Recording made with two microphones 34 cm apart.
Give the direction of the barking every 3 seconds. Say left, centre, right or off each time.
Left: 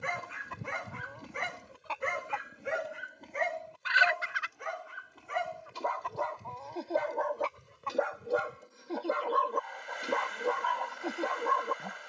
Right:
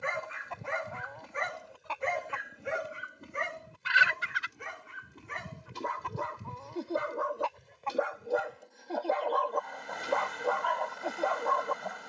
left, right, centre, left.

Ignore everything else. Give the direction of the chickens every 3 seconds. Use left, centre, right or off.
centre, right, centre, left.